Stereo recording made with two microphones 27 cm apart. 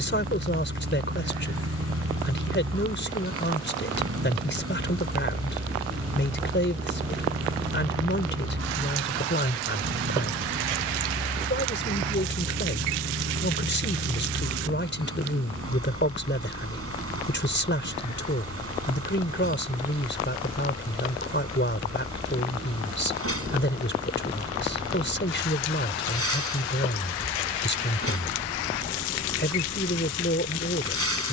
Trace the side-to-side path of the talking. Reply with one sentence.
You can hear the talking stay in one place.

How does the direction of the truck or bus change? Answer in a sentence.
You can hear the truck or bus stay in one place.